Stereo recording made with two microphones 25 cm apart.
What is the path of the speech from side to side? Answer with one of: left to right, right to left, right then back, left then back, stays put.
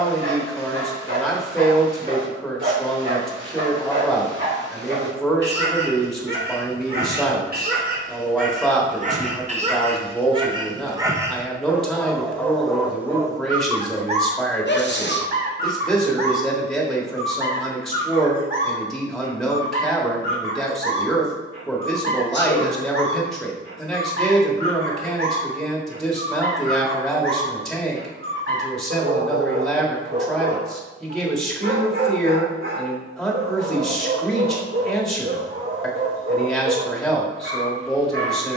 stays put.